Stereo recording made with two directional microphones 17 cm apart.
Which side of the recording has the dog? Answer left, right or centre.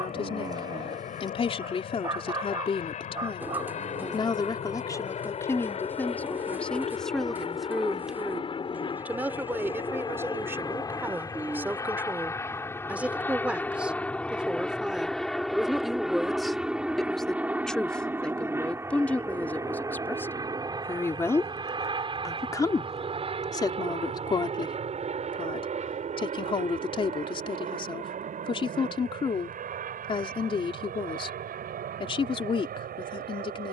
right.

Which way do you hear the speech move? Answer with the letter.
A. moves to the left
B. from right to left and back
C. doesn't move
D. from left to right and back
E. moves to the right
D.